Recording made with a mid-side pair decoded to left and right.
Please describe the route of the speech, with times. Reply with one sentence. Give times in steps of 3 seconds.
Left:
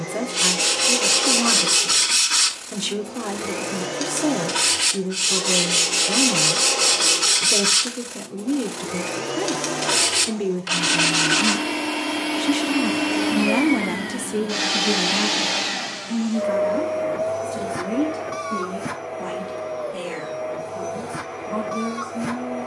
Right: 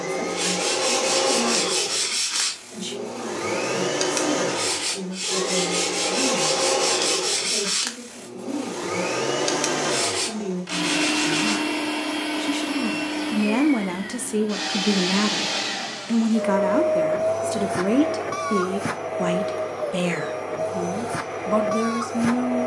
In this clip you hear the speech on the left from 0 s, in the centre from 12 s and on the right from 15 s.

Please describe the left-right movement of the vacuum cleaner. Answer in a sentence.
You can hear the vacuum cleaner go left and come back.